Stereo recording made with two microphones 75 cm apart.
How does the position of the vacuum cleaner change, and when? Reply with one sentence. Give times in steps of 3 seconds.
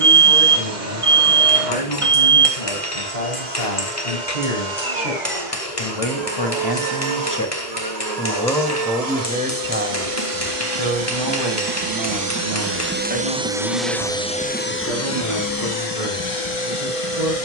You can hear the vacuum cleaner on the right from 0 s, in the centre from 12 s and on the left from 15 s.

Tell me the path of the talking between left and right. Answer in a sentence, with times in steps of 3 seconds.
You can hear the talking on the left from 0 s and on the right from 9 s.